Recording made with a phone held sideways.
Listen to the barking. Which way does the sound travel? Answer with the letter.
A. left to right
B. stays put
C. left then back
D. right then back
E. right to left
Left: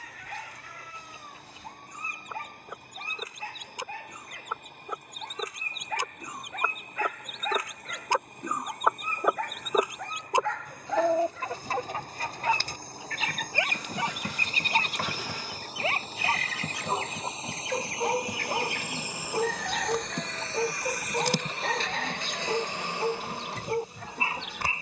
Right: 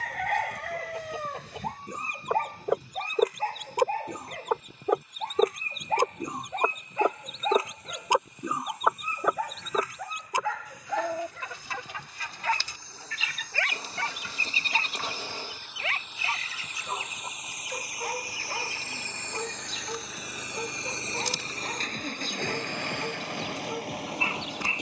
E.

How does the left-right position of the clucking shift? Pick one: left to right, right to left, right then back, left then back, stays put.
right to left.